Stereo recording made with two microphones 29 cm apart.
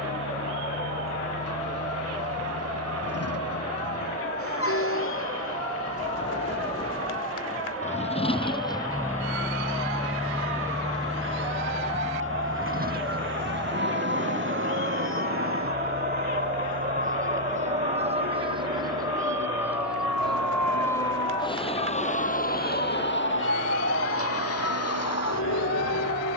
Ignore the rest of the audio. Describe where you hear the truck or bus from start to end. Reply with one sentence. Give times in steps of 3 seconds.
In this clip you hear the truck or bus on the left from 0 s, in the centre from 9 s and on the right from 12 s.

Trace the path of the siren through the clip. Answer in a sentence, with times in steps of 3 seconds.
In this clip you hear the siren on the right from 0 s, in the centre from 18 s and on the left from 21 s.